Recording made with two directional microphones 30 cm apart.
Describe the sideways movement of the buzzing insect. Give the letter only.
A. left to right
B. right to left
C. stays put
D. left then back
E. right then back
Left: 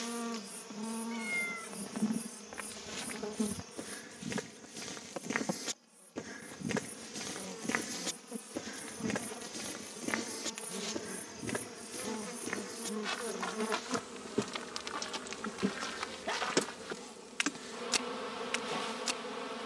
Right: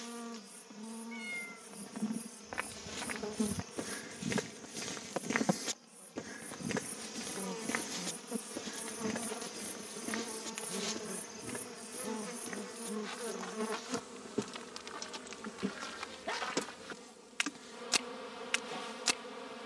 E.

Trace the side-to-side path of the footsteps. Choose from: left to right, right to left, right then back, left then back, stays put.
left then back.